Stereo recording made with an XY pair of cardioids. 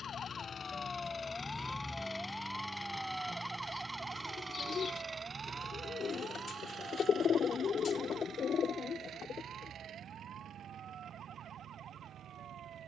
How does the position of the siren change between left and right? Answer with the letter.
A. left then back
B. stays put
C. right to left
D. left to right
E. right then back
D.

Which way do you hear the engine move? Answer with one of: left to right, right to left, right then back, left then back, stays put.
left to right.